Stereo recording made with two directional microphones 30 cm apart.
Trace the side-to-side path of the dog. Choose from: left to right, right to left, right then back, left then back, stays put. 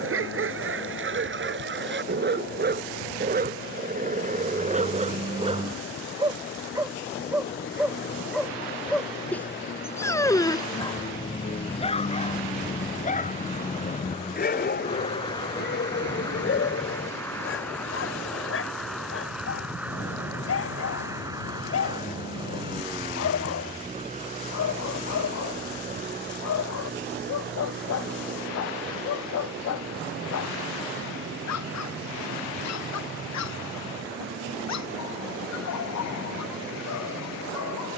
right to left.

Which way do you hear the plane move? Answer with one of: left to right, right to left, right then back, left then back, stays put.
left to right.